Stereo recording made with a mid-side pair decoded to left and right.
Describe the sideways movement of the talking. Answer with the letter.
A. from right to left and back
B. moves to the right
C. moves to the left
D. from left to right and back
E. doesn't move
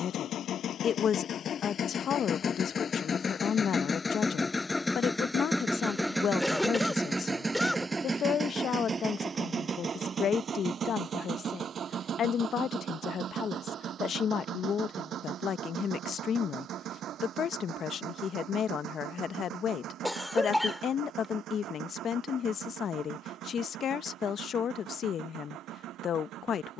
E.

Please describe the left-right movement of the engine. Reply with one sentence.
In this clip you hear the engine move from left to right.